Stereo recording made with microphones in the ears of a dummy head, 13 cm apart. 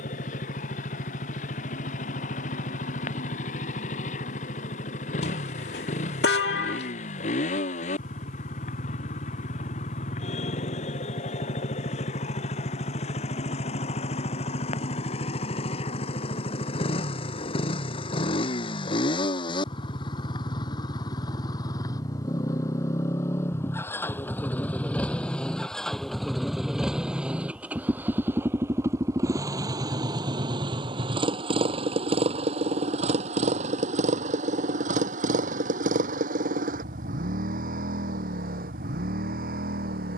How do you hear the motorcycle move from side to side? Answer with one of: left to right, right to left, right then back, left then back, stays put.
left to right.